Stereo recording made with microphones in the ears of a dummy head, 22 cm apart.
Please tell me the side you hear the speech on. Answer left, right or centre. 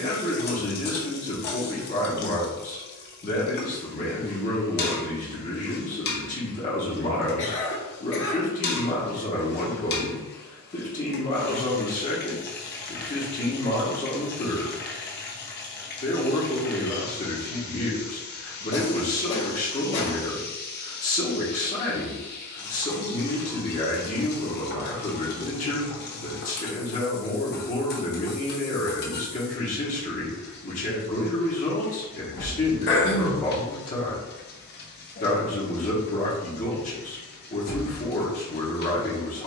left.